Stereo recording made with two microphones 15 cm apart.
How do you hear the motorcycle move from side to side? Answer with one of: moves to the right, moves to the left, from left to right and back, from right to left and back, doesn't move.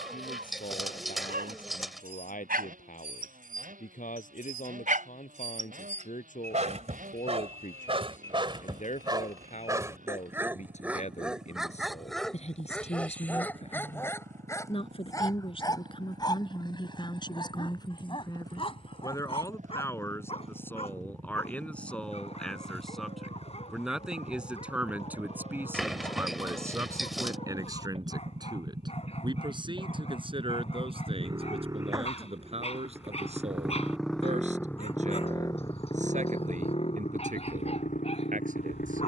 moves to the left.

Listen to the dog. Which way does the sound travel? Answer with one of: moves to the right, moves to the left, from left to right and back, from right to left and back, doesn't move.
moves to the left.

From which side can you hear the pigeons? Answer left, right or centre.
centre.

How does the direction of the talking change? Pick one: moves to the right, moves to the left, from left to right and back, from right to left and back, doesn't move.
moves to the right.